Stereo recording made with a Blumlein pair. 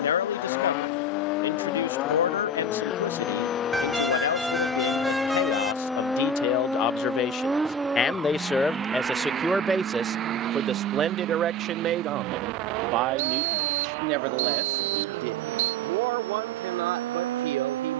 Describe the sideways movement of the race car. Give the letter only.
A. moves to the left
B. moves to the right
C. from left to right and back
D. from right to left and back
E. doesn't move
B.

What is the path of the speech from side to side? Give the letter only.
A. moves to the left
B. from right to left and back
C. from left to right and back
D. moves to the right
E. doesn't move
D.